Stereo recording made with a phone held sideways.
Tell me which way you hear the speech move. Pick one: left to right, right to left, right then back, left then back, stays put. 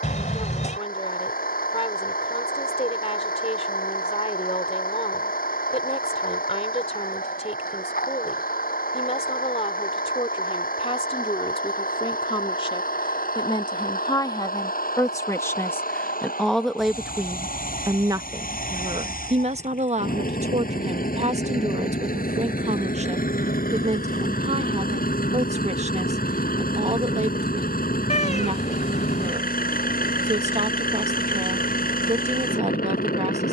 left to right.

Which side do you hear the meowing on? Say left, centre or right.
left.